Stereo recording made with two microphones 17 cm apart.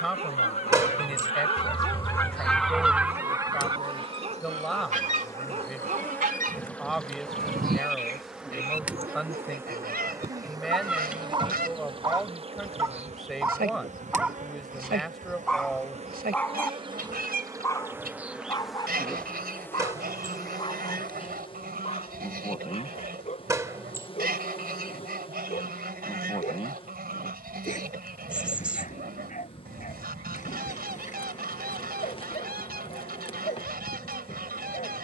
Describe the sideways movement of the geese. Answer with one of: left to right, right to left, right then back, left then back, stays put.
left to right.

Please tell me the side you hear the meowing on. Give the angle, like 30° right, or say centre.
10° right.